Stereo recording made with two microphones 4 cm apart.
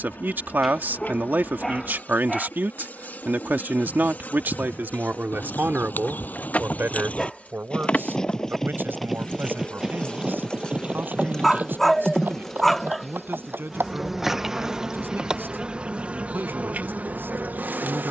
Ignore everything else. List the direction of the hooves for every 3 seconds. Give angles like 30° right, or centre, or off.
off, 50° left, 30° left, 20° right, 50° right, off.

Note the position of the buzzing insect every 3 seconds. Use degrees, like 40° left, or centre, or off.
50° left, 40° left, 30° left, 20° left, centre, 30° right.